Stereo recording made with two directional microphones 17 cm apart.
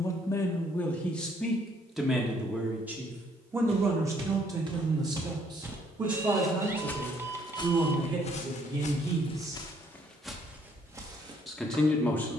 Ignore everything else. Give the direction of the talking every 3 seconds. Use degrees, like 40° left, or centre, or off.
centre, 20° right, 30° right, 10° right.